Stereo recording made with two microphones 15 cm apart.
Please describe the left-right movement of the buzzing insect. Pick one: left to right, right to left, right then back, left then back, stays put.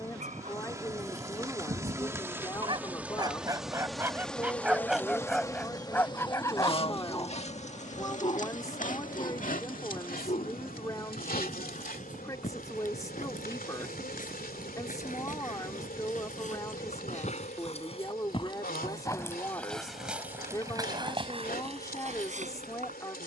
right to left.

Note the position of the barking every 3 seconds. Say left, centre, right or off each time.
right, centre, left, left, left, left, centre, right.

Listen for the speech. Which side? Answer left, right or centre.
left.